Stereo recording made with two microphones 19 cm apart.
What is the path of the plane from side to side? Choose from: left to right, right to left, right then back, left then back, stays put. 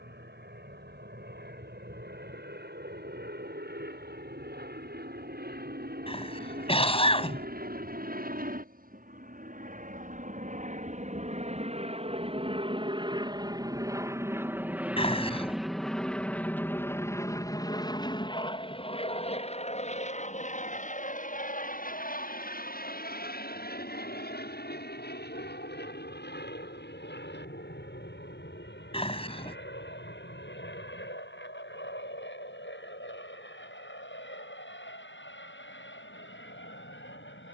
right to left.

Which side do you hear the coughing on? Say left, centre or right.
left.